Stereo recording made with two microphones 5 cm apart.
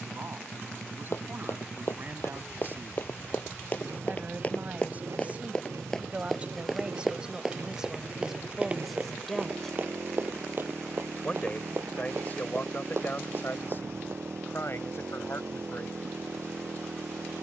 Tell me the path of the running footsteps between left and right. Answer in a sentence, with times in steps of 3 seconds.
You can hear the running footsteps on the left from 0 s, in the centre from 6 s, on the right from 9 s and not at all from 15 s.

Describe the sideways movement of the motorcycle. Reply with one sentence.
In this clip you hear the motorcycle stay put.